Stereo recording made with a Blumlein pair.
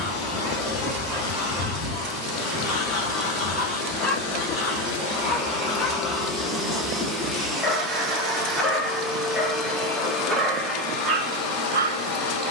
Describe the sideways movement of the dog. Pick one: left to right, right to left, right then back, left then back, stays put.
left then back.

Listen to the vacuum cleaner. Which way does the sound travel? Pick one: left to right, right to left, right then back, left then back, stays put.
right then back.